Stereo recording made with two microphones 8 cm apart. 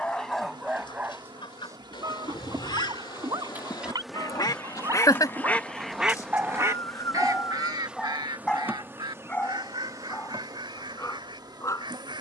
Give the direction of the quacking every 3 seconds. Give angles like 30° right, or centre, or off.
70° left, 40° left, 50° right, 70° right.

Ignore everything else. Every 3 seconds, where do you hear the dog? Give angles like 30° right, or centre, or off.
30° right, 50° right, centre, 30° left.